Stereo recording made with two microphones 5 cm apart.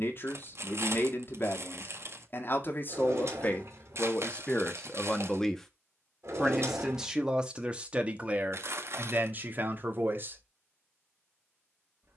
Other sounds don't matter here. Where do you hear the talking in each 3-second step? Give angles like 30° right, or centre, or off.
50° left, 20° left, 20° right, 40° right.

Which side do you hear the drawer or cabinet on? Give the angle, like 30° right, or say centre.
60° right.